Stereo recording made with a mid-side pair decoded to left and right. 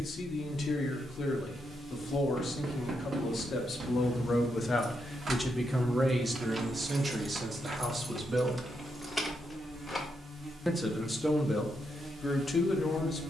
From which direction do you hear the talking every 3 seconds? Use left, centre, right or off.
left, left, right, centre, left.